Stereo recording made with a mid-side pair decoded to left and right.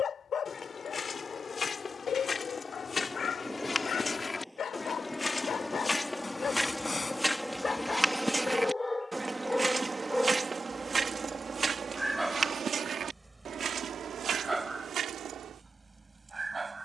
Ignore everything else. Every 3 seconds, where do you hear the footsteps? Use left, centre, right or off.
left, left, centre, right, right, right.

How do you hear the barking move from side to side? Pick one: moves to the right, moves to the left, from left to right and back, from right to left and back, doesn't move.
moves to the right.